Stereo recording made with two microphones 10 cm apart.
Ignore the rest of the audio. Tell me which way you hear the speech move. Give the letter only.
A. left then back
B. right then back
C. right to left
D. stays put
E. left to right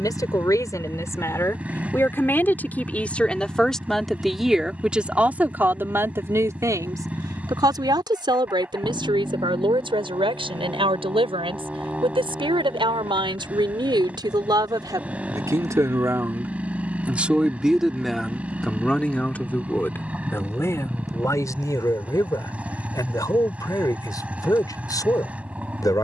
B.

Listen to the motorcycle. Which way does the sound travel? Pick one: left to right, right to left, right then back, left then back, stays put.
stays put.